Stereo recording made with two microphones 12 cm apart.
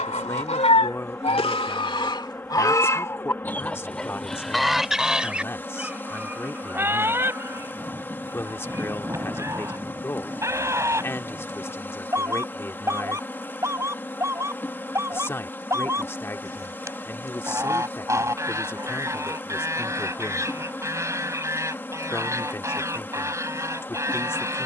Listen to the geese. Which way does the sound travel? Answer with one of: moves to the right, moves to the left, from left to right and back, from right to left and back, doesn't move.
moves to the right.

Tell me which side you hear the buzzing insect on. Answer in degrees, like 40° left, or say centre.
20° left.